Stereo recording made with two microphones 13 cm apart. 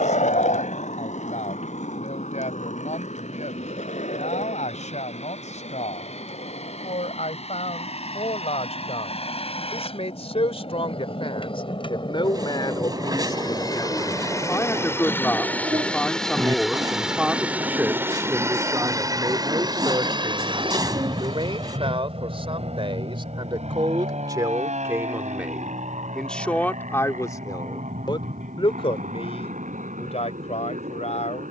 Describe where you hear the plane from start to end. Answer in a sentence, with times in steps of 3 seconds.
You can hear the plane on the left from 0 s, in the centre from 15 s and on the right from 18 s.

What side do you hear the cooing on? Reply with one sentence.
In this clip you hear the cooing on the right.